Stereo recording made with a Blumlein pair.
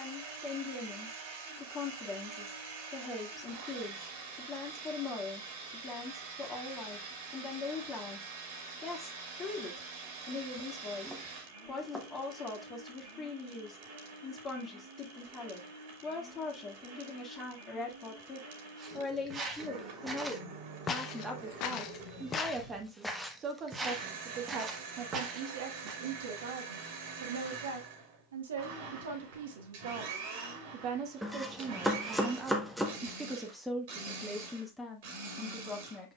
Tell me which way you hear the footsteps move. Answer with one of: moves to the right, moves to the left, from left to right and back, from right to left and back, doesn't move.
from right to left and back.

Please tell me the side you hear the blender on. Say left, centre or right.
right.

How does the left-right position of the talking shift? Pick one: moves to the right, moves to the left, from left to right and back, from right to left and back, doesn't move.
from left to right and back.